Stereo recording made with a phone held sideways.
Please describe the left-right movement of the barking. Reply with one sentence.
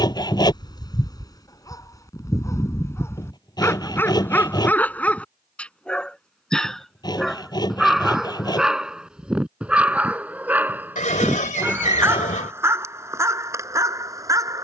You can hear the barking go from the left side to the right.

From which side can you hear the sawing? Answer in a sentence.
In this clip you hear the sawing on the left.